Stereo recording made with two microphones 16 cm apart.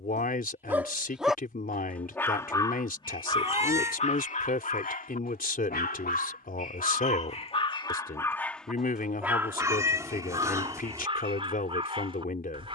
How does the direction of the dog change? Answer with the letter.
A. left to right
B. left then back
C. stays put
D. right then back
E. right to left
B.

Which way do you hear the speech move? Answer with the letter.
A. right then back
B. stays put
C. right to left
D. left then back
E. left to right
B.